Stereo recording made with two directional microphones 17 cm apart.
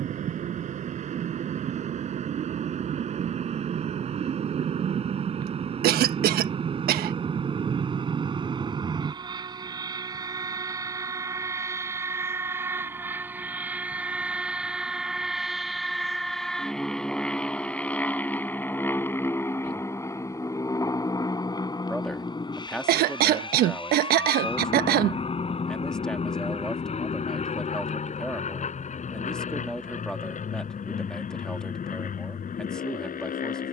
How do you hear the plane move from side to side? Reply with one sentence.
In this clip you hear the plane travel towards the left.